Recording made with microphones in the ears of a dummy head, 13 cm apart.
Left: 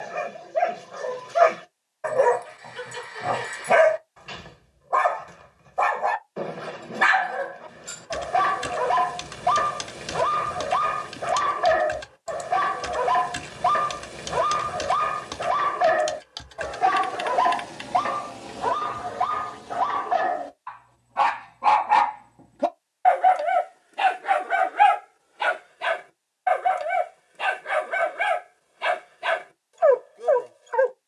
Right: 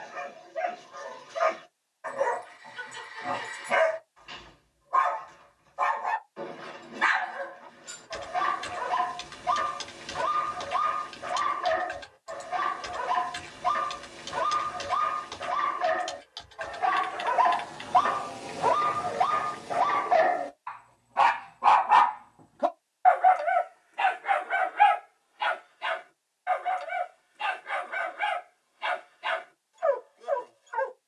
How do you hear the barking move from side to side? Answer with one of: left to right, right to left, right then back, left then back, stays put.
right then back.